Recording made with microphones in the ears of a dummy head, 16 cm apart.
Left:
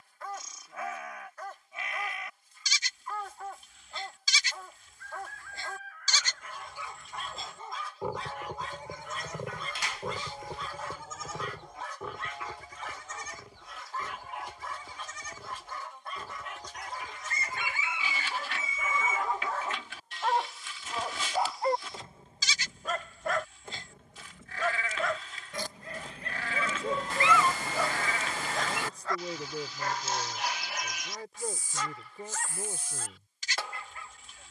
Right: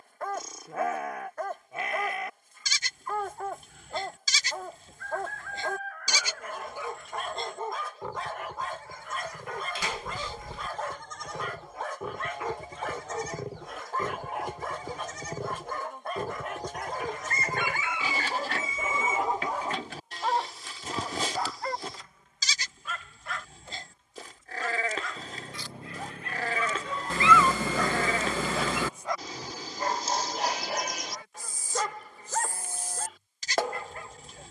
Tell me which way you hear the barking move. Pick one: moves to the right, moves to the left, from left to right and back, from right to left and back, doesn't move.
from right to left and back.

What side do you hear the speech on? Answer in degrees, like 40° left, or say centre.
40° left.